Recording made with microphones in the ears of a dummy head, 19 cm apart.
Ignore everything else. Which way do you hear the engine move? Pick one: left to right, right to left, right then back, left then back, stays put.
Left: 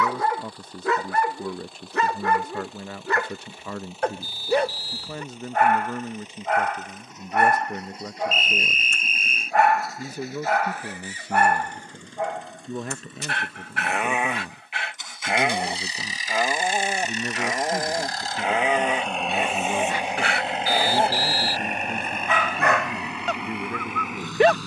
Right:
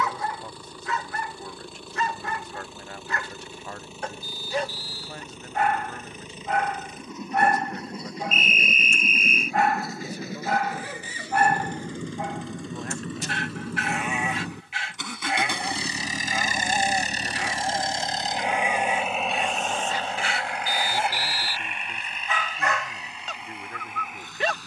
right to left.